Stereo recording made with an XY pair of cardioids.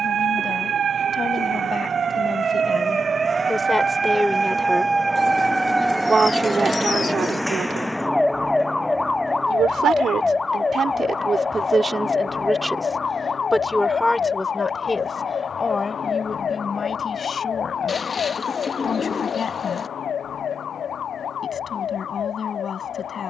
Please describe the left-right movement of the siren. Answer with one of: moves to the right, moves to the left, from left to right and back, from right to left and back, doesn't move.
moves to the left.